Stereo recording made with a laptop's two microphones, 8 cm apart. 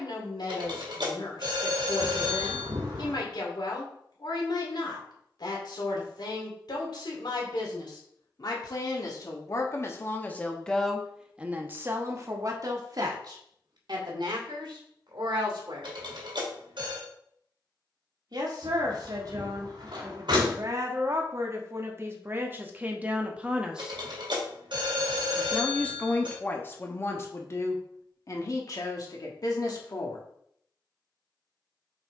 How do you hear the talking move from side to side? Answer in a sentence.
You can hear the talking move from left to right and back again.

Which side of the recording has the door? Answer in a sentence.
In this clip you hear the door on the right.